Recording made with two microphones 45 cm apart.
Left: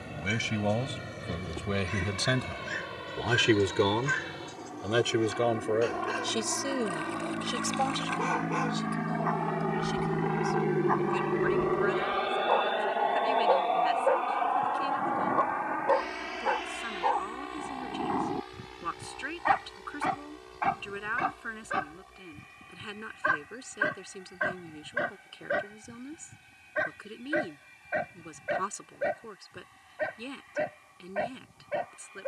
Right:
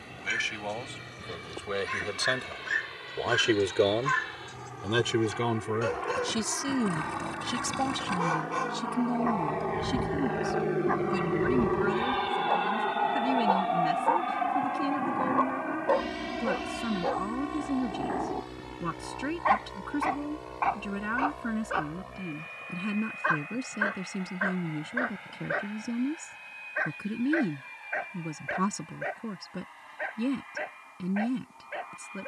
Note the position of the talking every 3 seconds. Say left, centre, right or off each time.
left, centre, right, right, right, right, right, right, right, right, right.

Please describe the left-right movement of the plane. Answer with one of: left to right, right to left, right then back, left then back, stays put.
left to right.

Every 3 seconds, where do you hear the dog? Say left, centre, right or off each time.
right, right, right, right, right, centre, left, left, left, left, left.